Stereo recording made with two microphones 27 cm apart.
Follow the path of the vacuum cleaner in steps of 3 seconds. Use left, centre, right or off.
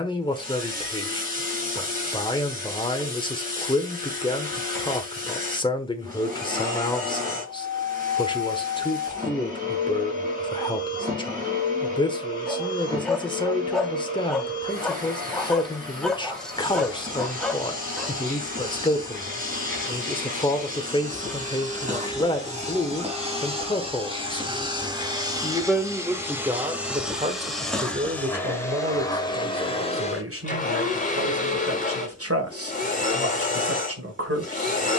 right, right, right, right, right, right, right, right, centre, centre, left, left.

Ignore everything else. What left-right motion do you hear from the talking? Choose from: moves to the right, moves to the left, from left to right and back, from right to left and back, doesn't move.
moves to the right.